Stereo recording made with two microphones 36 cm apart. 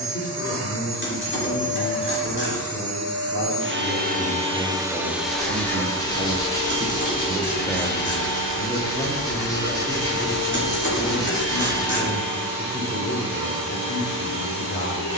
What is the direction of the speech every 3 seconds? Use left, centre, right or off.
left, centre, centre, left, left.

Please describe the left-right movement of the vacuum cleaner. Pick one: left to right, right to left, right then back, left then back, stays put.
right to left.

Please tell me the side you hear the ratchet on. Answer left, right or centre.
left.